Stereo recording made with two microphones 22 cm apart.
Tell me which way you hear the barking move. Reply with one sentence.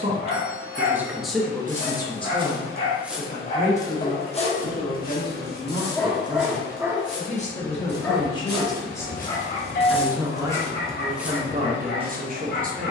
You can hear the barking move from left to right and back again.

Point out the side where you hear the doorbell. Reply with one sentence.
In this clip you hear the doorbell on the left.